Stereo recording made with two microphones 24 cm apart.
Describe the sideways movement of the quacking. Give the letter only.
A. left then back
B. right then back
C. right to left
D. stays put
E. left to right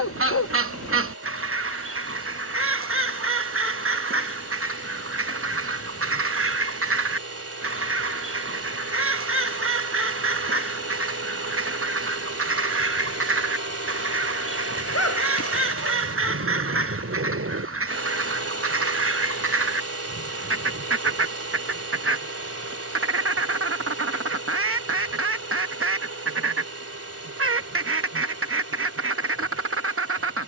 D.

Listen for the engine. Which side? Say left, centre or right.
right.